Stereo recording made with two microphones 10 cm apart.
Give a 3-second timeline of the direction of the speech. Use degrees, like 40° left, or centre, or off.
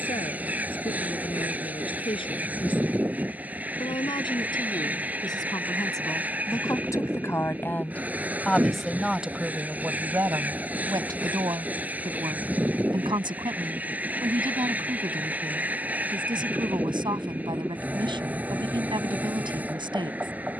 60° left, 50° left, 20° left, 30° right, 50° right, 50° right, 50° right.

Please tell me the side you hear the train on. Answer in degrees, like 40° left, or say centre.
20° right.